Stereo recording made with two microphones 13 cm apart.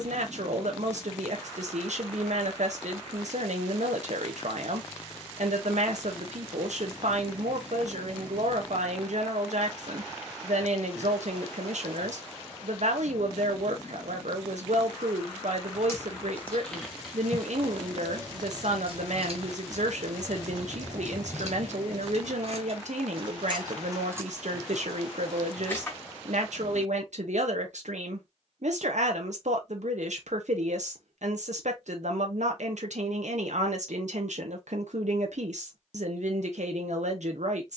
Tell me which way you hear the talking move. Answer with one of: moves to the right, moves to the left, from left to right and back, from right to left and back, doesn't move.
doesn't move.